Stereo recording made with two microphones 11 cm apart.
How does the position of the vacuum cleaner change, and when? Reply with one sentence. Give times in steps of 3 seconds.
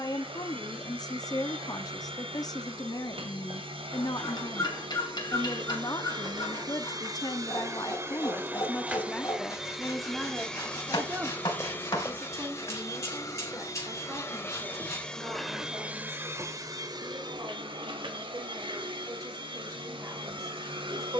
In this clip you hear the vacuum cleaner on the right from 0 s, in the centre from 9 s, on the left from 12 s and on the right from 15 s.